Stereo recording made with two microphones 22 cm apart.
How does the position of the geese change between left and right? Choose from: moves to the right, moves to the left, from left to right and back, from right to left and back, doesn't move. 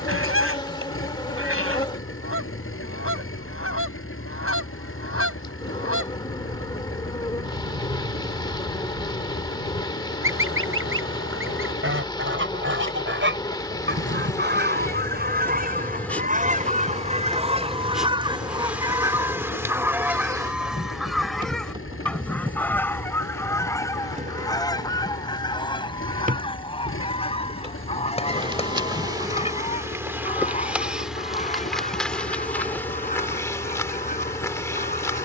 moves to the left.